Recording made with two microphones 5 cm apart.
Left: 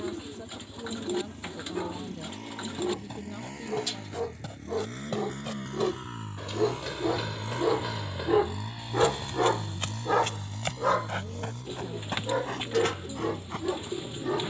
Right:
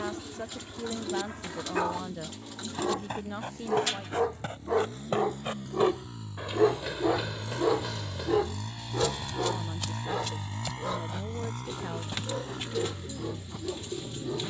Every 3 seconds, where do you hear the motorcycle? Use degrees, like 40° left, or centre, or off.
70° left, 60° left, 30° left, 30° right, 70° right.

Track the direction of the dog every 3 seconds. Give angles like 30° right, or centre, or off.
70° right, 50° right, 10° right, 60° left, 80° left.